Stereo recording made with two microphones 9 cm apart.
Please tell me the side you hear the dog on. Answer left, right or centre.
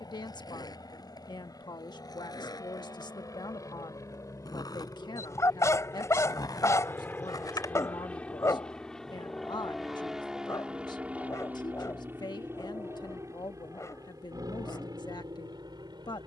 left.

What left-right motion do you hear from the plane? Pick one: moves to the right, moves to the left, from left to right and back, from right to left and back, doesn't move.
moves to the right.